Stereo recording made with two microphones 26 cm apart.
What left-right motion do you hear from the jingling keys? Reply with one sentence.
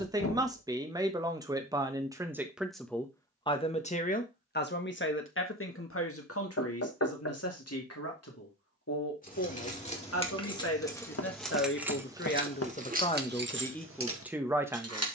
In this clip you hear the jingling keys move to the right.